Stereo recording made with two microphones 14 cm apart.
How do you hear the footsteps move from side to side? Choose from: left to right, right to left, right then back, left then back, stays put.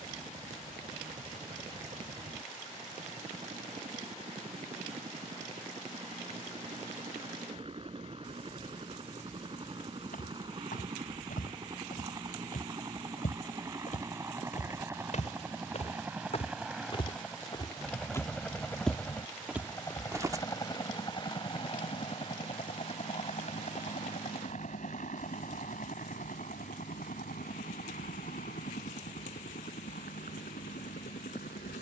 left to right.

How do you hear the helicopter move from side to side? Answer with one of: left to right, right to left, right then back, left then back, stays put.
right to left.